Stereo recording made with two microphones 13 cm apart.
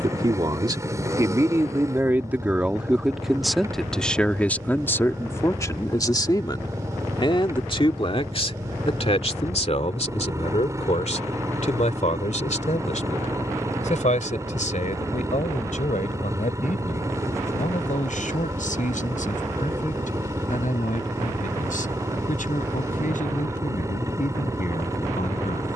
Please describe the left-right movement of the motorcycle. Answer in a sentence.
You can hear the motorcycle stay in one place.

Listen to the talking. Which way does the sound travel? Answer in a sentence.
In this clip you hear the talking move from right to left.